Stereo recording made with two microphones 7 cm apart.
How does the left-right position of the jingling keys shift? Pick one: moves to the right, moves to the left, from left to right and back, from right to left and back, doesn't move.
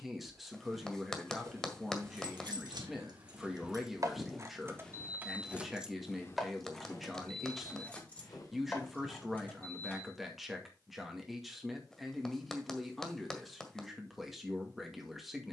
moves to the left.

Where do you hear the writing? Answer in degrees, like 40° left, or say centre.
10° left.